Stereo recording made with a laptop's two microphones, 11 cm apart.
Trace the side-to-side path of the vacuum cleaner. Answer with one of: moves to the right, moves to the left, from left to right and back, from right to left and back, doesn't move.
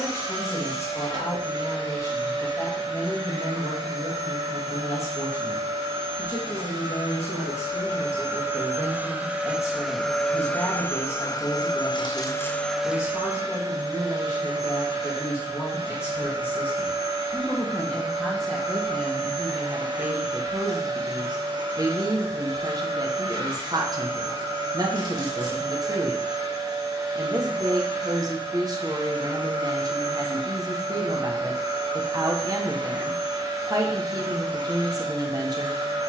from right to left and back.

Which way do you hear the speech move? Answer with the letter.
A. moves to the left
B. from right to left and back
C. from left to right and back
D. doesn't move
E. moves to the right
E.